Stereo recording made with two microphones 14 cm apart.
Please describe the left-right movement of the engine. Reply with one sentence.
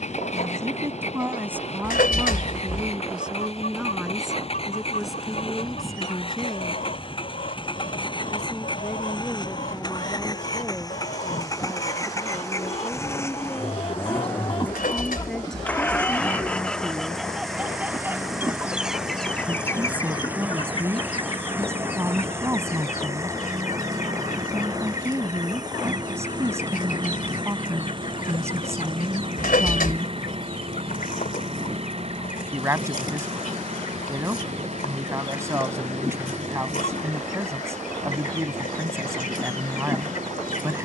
In this clip you hear the engine move to the right.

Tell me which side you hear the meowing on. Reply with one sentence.
In this clip you hear the meowing on the left.